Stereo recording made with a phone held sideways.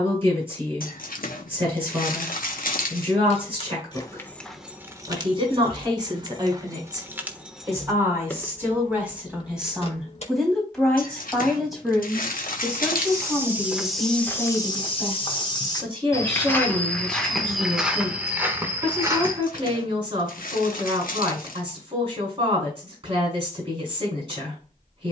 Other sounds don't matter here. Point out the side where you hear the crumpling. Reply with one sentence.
You can hear the crumpling on the left.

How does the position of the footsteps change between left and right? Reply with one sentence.
In this clip you hear the footsteps move from right to left and back again.